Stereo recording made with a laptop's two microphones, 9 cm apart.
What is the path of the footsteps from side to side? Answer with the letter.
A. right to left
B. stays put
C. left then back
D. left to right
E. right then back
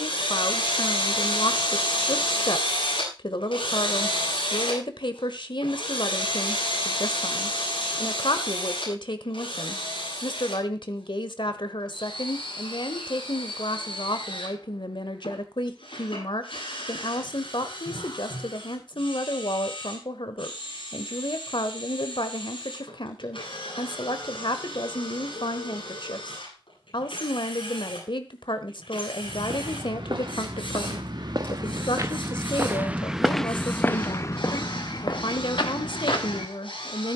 A.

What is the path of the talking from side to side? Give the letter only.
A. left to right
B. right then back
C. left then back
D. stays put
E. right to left
D.